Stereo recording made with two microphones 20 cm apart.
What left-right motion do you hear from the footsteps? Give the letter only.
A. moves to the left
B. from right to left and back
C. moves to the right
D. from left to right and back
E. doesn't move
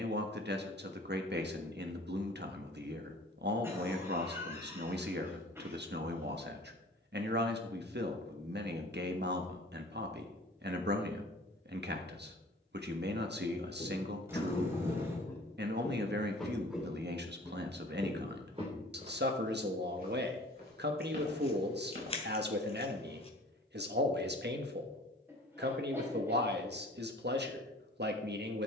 C.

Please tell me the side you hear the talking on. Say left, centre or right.
right.